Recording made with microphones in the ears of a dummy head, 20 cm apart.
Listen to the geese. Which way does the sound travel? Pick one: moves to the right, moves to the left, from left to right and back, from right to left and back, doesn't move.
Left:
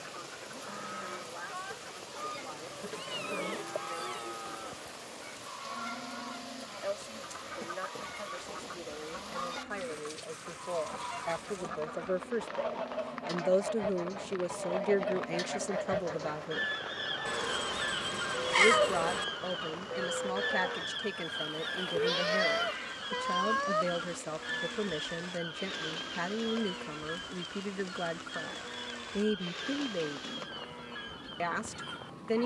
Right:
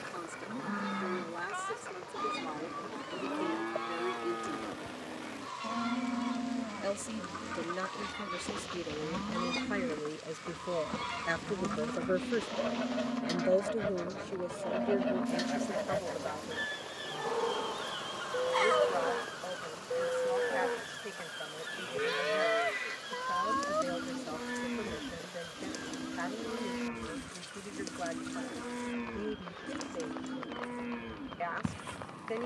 moves to the left.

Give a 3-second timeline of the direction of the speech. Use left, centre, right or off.
right, right, right, right, centre, left, left, left, left, left, left.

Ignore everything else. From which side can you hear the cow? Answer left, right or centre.
right.